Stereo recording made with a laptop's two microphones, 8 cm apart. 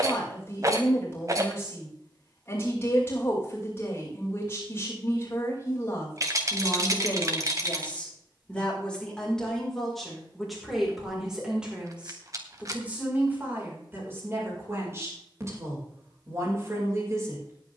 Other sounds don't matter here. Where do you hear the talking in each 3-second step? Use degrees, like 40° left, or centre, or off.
30° left, 30° left, 20° left, centre, 20° right, 40° right.